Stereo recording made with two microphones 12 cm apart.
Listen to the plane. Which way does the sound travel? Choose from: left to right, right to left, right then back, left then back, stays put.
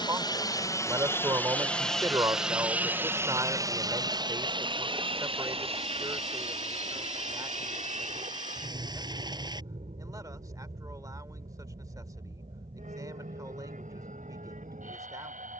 left to right.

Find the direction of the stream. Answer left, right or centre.
right.